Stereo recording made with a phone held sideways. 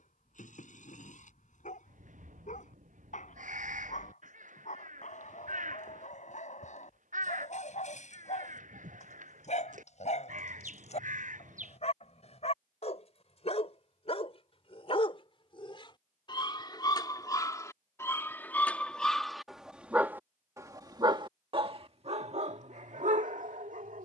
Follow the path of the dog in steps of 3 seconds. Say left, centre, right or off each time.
left, left, left, left, left, left, centre, right.